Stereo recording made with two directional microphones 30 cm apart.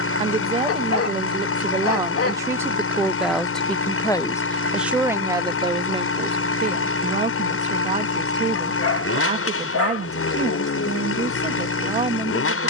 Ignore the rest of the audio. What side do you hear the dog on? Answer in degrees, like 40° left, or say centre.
60° left.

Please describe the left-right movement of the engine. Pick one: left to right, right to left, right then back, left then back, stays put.
stays put.